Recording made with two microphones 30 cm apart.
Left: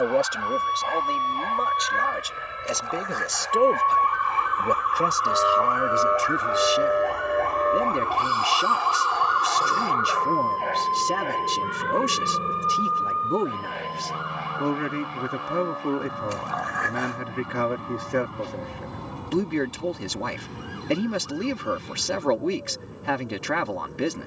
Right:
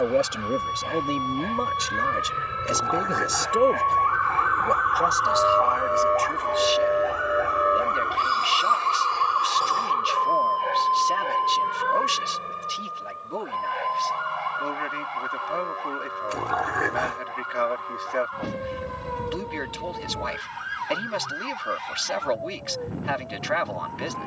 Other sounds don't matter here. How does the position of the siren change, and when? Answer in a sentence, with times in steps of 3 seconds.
In this clip you hear the siren on the left from 0 s, in the centre from 6 s and on the right from 9 s.